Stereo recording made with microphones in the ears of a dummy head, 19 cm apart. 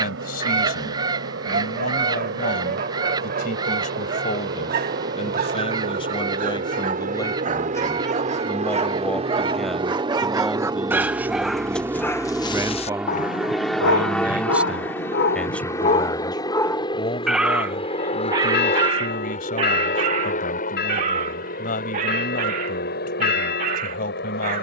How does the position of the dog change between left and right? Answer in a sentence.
You can hear the dog move from right to left and back again.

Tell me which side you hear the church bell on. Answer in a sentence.
You can hear the church bell on the left.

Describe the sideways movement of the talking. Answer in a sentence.
In this clip you hear the talking move from left to right and back again.